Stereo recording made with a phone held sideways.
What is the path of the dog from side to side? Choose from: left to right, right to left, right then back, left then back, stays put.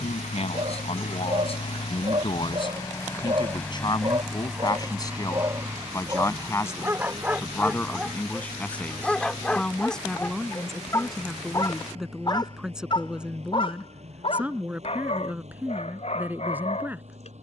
right to left.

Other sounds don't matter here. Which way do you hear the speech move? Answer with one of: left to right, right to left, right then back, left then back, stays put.
left to right.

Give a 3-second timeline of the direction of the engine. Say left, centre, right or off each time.
left, centre, right, right, right, right.